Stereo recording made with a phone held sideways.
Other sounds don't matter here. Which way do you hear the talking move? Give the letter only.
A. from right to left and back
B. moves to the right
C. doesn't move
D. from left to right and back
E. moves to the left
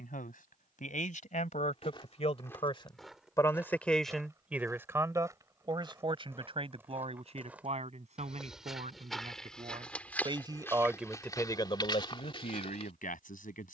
D.